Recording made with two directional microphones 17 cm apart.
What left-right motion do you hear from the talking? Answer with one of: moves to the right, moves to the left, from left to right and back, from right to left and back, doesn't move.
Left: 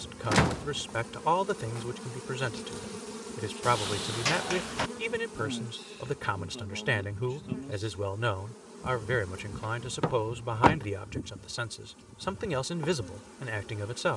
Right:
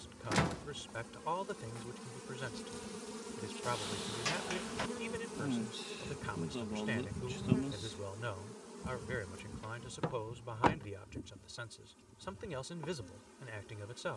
doesn't move.